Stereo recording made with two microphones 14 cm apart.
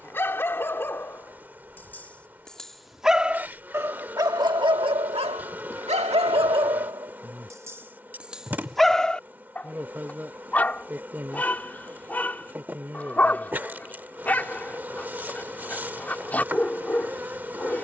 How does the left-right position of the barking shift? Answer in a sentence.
In this clip you hear the barking go right and come back.